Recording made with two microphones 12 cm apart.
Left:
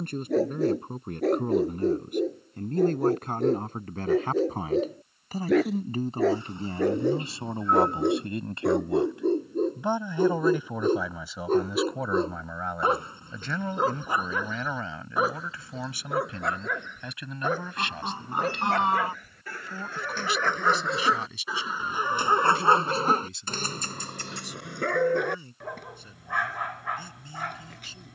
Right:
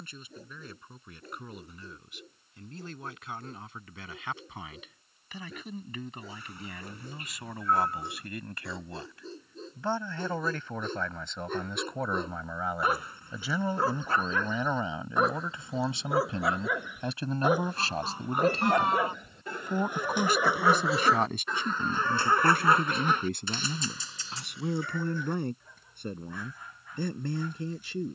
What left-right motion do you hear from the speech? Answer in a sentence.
You can hear the speech go from the left side to the right.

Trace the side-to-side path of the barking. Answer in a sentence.
You can hear the barking move from left to right and back again.